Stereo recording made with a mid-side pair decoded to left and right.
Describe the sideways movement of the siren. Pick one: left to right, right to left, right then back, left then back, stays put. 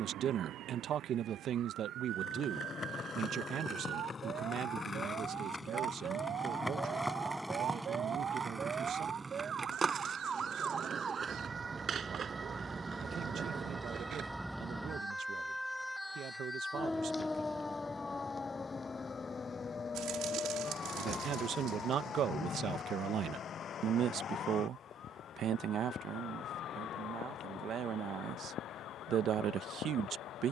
right to left.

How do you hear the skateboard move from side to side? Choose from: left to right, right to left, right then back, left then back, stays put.
left to right.